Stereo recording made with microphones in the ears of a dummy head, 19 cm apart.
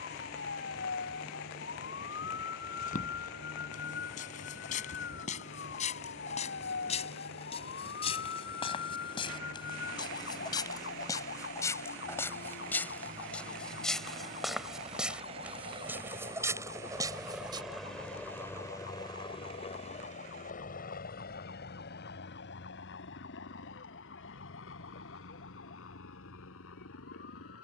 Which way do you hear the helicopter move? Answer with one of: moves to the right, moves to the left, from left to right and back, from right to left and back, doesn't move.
moves to the left.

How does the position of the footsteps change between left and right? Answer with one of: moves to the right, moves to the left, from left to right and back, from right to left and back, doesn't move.
moves to the right.